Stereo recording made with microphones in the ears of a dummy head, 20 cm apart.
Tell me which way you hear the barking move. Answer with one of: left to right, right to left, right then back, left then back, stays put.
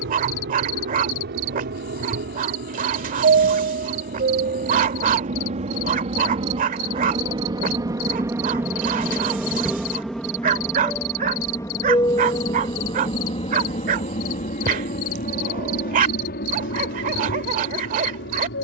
stays put.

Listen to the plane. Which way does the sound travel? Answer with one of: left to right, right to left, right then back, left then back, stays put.
right to left.